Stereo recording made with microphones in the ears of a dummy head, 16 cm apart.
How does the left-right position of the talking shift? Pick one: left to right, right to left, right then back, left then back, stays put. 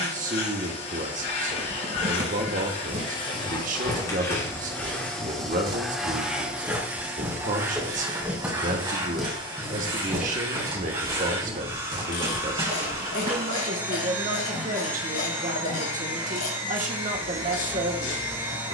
stays put.